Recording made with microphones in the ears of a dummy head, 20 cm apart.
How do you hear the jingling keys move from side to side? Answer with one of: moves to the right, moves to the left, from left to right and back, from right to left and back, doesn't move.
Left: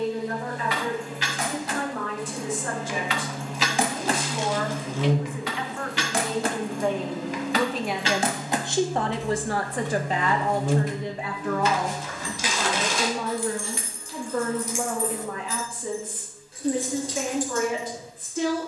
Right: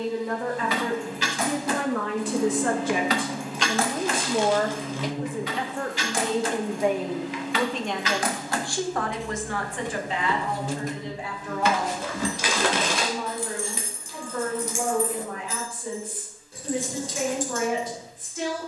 from right to left and back.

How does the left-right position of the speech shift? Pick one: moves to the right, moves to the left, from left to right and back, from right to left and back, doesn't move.
moves to the left.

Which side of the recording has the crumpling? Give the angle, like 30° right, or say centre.
50° right.